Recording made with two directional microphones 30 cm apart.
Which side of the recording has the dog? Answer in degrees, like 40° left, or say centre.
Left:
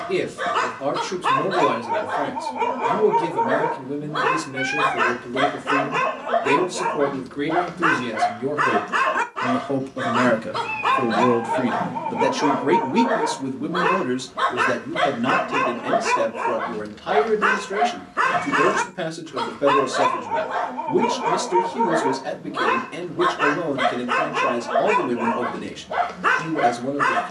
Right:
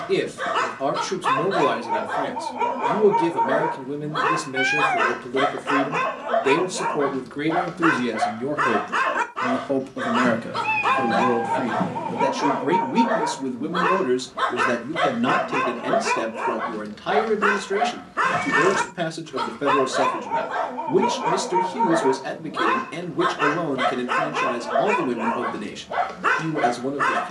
10° left.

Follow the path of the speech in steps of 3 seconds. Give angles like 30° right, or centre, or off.
20° right, 20° right, 20° right, 10° left, centre, 20° right, 20° right, 20° right, 20° right.